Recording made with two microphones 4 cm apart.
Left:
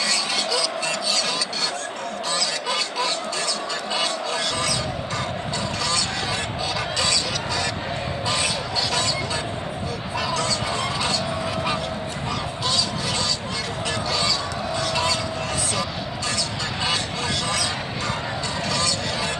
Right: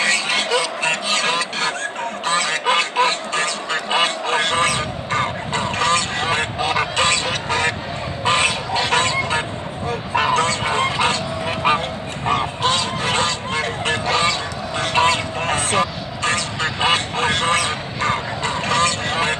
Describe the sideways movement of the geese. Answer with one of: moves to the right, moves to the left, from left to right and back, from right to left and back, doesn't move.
doesn't move.